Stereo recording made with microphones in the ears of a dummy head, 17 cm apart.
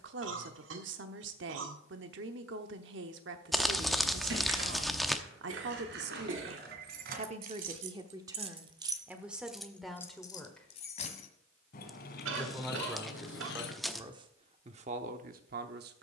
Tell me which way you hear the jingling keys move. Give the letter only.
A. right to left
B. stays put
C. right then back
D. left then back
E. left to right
A.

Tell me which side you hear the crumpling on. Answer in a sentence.
You can hear the crumpling in the centre.